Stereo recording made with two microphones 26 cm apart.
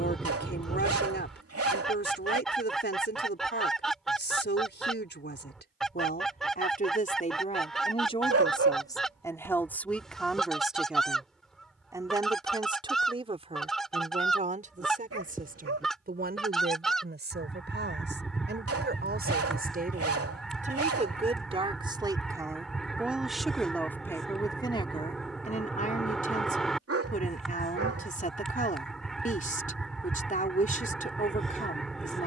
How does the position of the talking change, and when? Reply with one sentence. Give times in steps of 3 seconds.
You can hear the talking on the left from 0 s, in the centre from 9 s, on the right from 12 s, in the centre from 21 s and on the left from 24 s.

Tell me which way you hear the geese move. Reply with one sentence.
You can hear the geese stay put.